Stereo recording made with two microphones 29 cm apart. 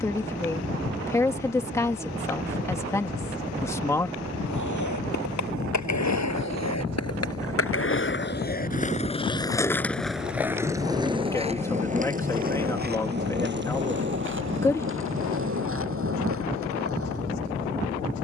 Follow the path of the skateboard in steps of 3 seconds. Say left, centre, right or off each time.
off, left, left, centre, right, right.